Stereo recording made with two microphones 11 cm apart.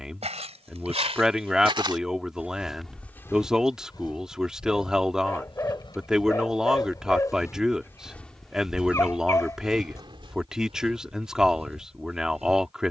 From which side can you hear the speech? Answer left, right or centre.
centre.